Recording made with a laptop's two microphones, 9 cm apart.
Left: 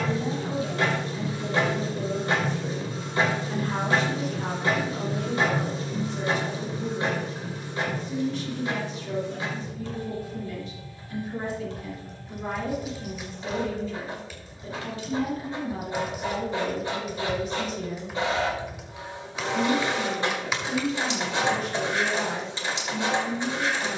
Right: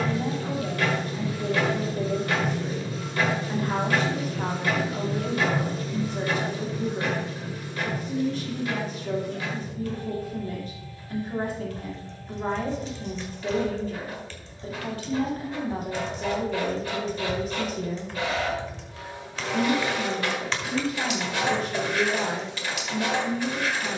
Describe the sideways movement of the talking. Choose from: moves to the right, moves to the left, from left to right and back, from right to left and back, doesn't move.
doesn't move.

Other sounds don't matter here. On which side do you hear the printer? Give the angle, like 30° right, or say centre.
30° left.